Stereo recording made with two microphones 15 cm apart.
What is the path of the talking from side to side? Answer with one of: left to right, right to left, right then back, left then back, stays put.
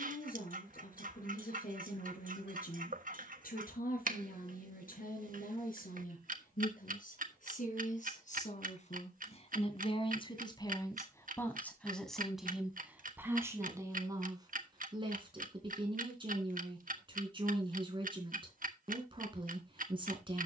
left to right.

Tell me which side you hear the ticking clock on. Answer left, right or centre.
right.